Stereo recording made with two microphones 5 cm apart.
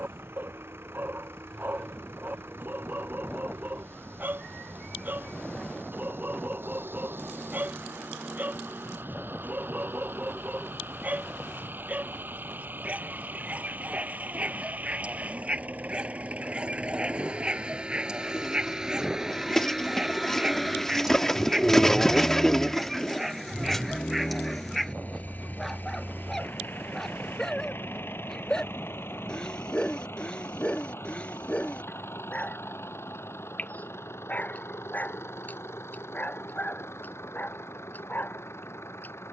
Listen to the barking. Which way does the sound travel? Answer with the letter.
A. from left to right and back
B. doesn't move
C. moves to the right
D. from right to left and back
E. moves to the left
E.